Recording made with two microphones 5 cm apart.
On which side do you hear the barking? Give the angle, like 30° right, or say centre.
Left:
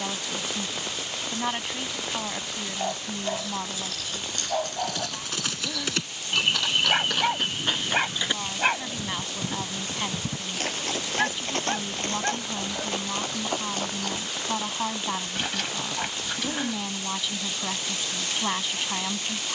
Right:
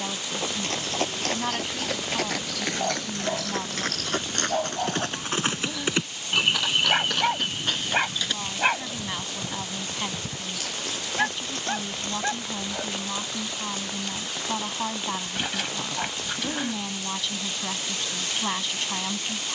centre.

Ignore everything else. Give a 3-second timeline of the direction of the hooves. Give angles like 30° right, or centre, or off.
70° right, 40° right, 10° left, 40° left, 50° left, off, off.